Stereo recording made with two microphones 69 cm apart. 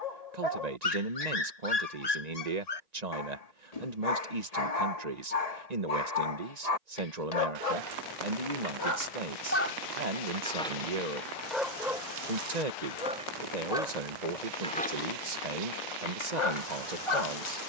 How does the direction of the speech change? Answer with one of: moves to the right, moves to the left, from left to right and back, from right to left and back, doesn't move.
doesn't move.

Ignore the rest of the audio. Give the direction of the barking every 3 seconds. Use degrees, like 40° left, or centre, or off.
60° left, 60° left, 50° left, 10° left, centre, 40° left.